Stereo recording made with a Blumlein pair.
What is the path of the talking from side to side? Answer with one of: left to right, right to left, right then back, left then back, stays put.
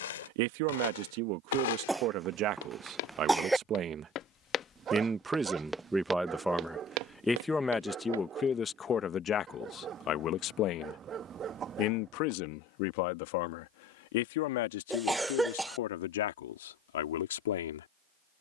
right to left.